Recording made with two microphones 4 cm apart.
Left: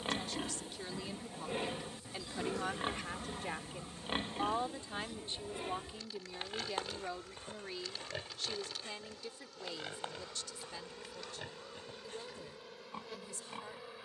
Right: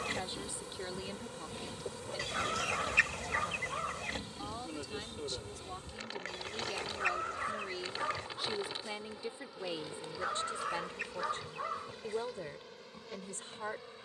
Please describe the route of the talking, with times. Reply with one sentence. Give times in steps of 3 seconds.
In this clip you hear the talking in the centre from 0 s, on the left from 3 s, in the centre from 6 s and on the right from 9 s.